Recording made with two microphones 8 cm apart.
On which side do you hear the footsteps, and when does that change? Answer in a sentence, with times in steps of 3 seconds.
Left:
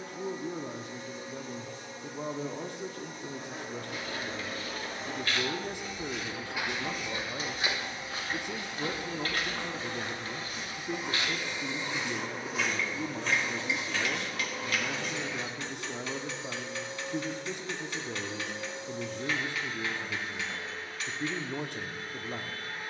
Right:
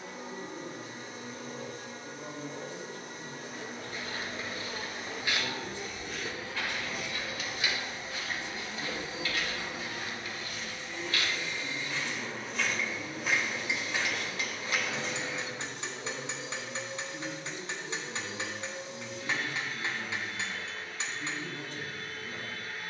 You can hear the footsteps not at all from 0 s, on the right from 3 s, on the left from 6 s, in the centre from 12 s, on the right from 15 s and not at all from 18 s.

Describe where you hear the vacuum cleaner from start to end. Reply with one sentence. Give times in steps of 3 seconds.
You can hear the vacuum cleaner on the right from 0 s, in the centre from 9 s and on the left from 12 s.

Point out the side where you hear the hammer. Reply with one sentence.
You can hear the hammer on the right.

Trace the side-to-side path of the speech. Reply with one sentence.
In this clip you hear the speech stay in one place.